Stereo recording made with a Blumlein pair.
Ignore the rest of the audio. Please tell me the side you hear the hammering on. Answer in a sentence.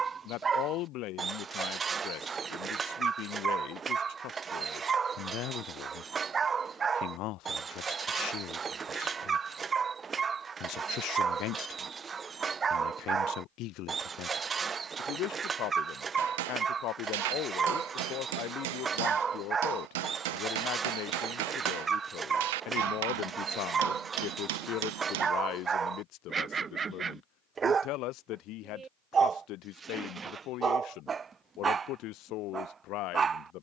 In this clip you hear the hammering on the right.